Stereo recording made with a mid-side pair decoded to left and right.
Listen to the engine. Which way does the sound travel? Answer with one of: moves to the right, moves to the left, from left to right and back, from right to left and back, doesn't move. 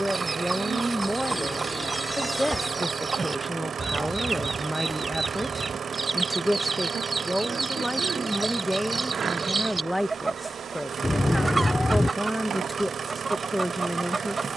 doesn't move.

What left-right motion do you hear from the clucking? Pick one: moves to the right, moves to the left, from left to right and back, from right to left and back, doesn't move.
doesn't move.